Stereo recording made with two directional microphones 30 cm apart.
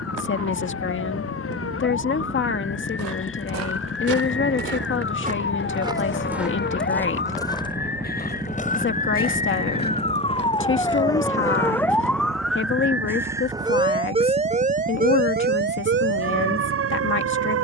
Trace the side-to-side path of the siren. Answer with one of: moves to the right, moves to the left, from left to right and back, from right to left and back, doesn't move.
moves to the right.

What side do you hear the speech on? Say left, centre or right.
left.